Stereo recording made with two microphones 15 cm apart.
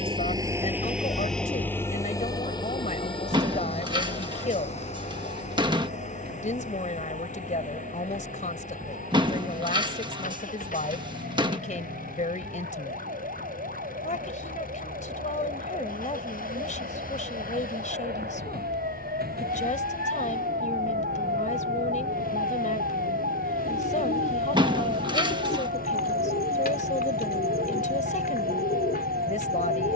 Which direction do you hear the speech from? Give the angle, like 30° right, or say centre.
50° left.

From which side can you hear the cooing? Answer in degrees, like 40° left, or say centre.
70° left.